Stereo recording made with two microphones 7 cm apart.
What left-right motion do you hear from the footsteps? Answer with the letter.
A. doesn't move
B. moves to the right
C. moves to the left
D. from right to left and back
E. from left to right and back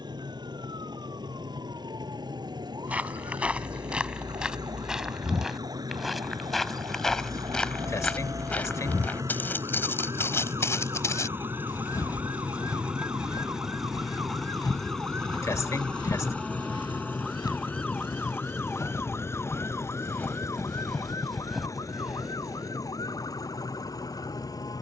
D.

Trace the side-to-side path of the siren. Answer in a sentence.
In this clip you hear the siren go from the right side to the left.